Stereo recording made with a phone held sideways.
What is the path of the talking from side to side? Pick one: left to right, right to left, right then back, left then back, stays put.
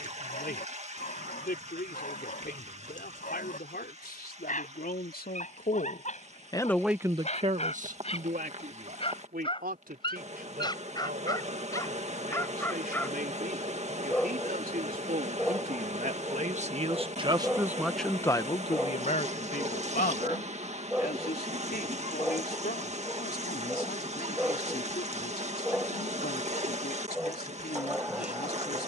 right then back.